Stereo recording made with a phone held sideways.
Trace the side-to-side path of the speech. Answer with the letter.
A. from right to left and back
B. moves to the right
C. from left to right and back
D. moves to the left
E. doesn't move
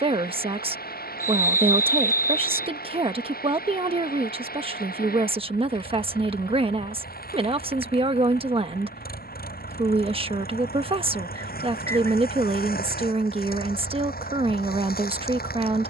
E.